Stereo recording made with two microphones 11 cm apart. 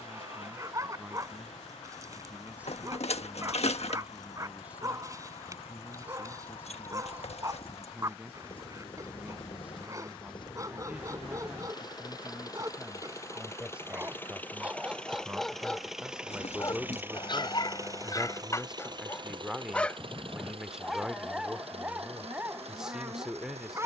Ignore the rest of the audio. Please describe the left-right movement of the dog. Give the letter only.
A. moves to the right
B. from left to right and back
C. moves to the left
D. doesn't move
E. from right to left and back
E.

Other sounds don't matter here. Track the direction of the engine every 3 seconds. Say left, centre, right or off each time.
left, left, left, left, left, centre, right, right.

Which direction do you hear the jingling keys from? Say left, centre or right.
left.